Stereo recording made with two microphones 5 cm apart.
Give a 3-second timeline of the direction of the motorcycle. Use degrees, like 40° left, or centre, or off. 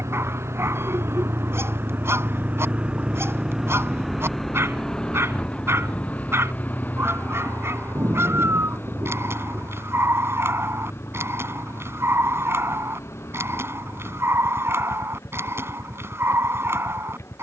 50° right, 10° left, 40° left, 50° left, 60° left, 60° left.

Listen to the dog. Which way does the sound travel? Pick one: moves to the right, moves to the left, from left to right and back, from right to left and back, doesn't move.
doesn't move.